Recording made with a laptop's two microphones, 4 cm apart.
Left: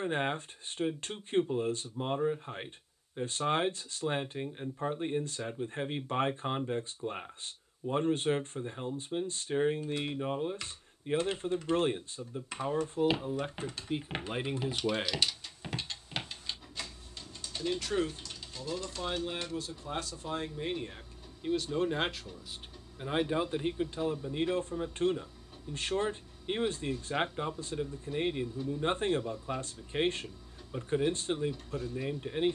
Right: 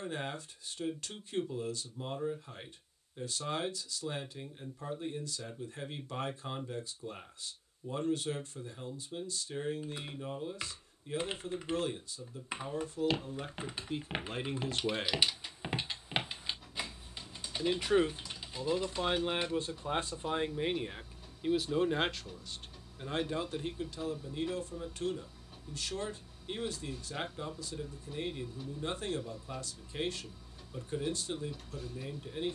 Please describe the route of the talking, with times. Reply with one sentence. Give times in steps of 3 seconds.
In this clip you hear the talking on the left from 0 s, in the centre from 15 s, on the right from 18 s, in the centre from 21 s and on the left from 24 s.